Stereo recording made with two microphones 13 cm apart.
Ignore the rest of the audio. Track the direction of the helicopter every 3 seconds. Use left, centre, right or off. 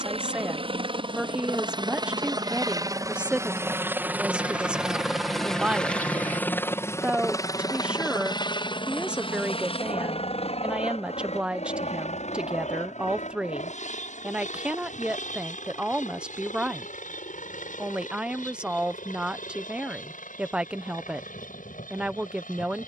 right, centre, left, left, left, left, left, left.